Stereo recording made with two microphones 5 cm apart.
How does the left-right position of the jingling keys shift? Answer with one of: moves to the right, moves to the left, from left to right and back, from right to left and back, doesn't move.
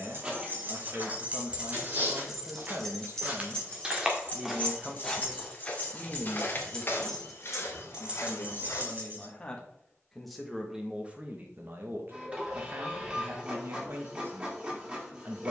from right to left and back.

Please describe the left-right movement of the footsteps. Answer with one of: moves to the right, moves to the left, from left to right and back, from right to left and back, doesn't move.
moves to the left.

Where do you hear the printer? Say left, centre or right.
right.